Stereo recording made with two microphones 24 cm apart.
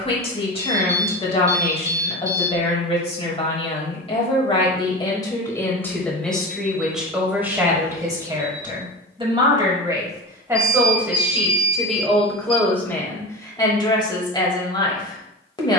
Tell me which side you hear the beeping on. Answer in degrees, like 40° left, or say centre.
20° right.